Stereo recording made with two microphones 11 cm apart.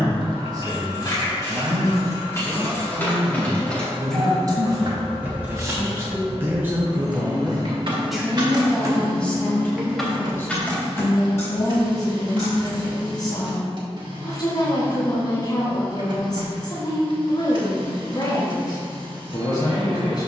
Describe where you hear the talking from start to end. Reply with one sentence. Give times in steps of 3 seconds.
In this clip you hear the talking on the right from 0 s, in the centre from 6 s and on the left from 9 s.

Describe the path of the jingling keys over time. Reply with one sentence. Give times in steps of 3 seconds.
You can hear the jingling keys on the left from 0 s, in the centre from 3 s, on the right from 6 s, in the centre from 9 s, on the left from 12 s and not at all from 15 s.